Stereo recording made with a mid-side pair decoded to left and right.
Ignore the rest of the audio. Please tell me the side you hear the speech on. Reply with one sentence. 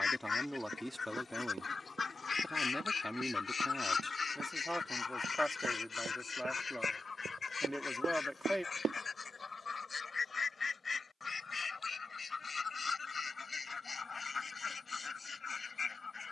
In this clip you hear the speech in the centre.